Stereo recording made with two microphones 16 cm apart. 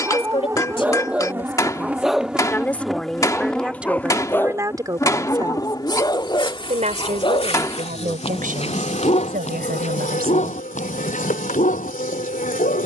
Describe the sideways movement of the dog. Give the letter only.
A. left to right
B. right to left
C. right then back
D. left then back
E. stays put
B.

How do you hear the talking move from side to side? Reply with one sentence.
In this clip you hear the talking move to the right.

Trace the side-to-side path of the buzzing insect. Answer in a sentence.
In this clip you hear the buzzing insect go from the right side to the left.